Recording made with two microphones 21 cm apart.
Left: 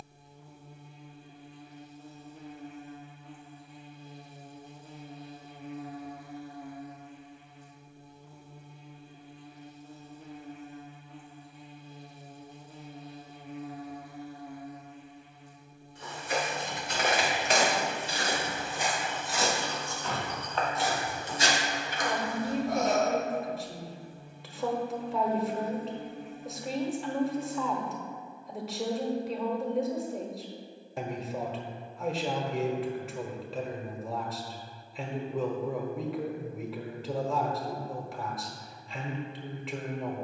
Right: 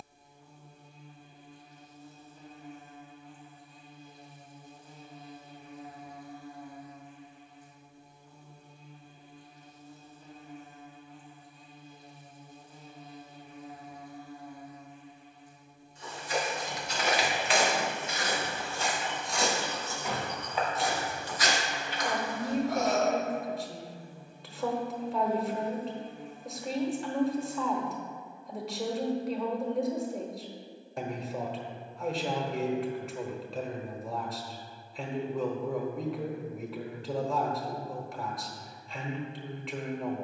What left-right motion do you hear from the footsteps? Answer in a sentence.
In this clip you hear the footsteps move from left to right and back again.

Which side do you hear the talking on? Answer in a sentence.
You can hear the talking in the centre.